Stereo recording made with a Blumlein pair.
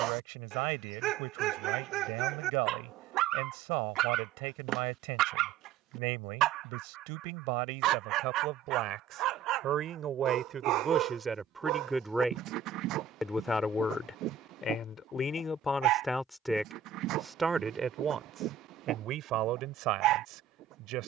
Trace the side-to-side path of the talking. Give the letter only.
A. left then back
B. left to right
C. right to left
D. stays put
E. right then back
A.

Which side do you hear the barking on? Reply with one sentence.
In this clip you hear the barking on the right.